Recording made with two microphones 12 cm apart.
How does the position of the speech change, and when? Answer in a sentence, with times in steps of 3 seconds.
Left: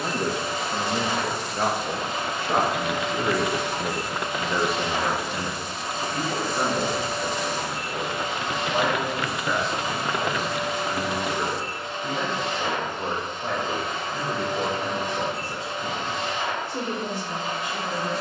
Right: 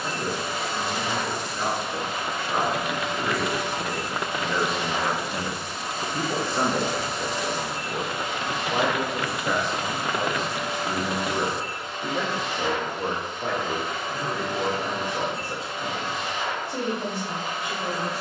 You can hear the speech on the left from 0 s, in the centre from 3 s and on the right from 6 s.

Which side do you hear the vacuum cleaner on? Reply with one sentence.
You can hear the vacuum cleaner in the centre.